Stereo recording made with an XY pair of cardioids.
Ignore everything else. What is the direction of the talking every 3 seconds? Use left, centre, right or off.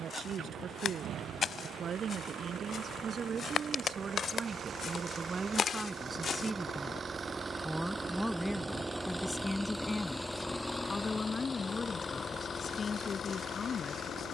right, right, centre, left, left.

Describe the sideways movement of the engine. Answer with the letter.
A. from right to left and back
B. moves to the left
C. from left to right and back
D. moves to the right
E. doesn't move
B.